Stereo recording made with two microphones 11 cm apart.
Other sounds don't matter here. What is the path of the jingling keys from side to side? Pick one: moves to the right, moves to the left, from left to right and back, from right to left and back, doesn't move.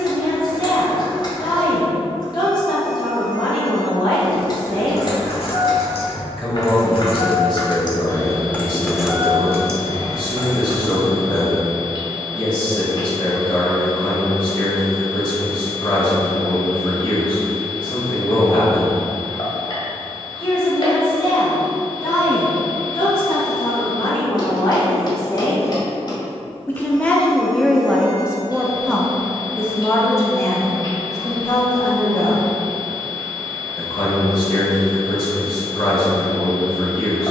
moves to the right.